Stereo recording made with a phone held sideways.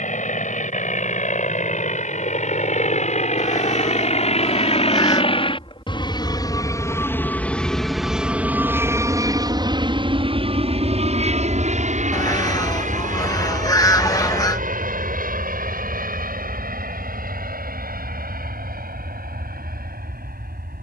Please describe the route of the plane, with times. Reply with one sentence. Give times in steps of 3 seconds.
In this clip you hear the plane on the left from 0 s, in the centre from 6 s and on the right from 9 s.